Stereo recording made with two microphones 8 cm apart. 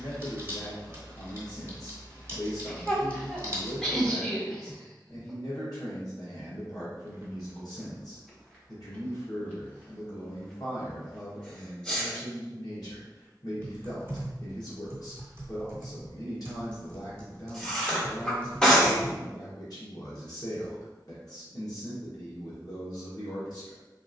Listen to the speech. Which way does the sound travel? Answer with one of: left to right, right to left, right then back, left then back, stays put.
stays put.